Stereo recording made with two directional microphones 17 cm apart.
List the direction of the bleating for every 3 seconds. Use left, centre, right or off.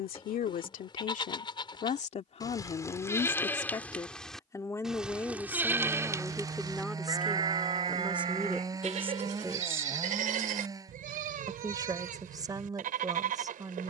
left, centre, right, right, right.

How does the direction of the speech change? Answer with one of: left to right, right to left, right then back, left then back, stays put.
left to right.